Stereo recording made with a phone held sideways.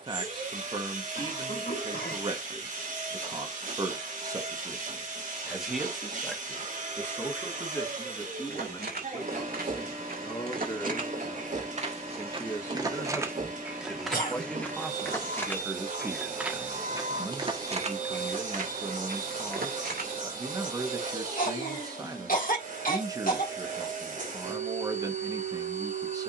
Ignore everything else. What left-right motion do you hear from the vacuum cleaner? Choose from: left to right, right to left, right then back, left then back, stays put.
stays put.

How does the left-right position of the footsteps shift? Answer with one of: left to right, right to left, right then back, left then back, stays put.
left then back.